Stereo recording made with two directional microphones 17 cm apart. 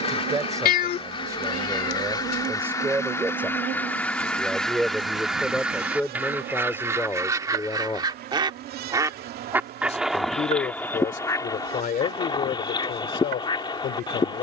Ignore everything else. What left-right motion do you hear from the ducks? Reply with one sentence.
In this clip you hear the ducks move from left to right and back again.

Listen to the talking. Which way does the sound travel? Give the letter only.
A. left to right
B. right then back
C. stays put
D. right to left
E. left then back
D.